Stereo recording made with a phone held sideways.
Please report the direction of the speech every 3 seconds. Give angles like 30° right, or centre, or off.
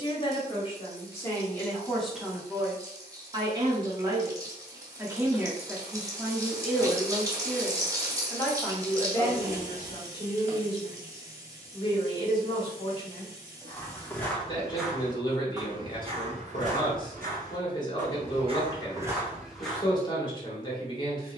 10° left, 20° right, centre, 20° left, 30° left, 30° left, 30° left.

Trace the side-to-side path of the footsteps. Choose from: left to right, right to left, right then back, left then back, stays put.
right then back.